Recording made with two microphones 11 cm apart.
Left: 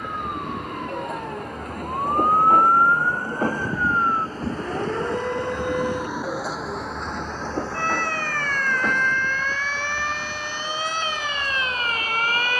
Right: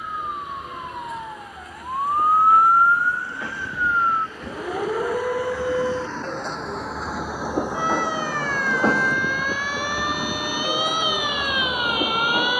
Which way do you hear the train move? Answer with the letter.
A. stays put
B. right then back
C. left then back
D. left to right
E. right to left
D.